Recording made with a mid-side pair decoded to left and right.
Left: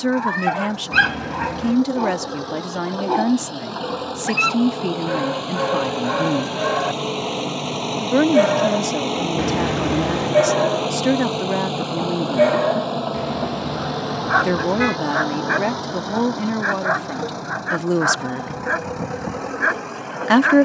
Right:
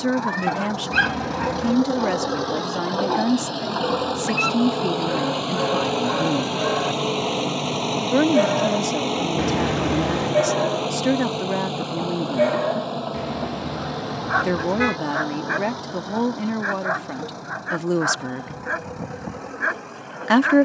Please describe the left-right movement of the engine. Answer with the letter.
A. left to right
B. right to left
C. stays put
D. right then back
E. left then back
B.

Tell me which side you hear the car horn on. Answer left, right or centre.
centre.